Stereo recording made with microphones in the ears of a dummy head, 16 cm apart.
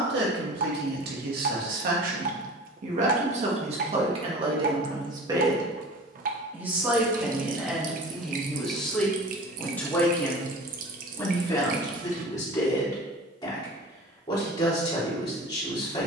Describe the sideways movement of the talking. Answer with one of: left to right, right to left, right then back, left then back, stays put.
right to left.